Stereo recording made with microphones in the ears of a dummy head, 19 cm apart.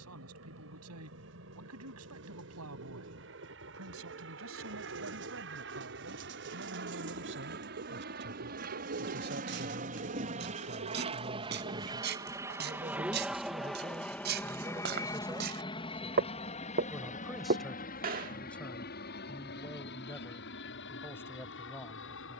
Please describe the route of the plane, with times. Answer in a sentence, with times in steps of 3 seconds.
In this clip you hear the plane on the right from 0 s, in the centre from 12 s and on the left from 15 s.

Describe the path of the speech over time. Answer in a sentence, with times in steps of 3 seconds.
In this clip you hear the speech on the right from 0 s and in the centre from 15 s.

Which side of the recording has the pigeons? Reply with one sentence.
You can hear the pigeons on the right.